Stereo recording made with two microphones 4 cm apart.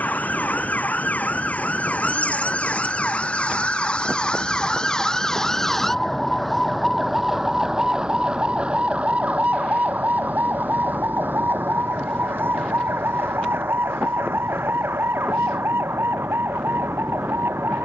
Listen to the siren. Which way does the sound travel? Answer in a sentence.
In this clip you hear the siren move to the right.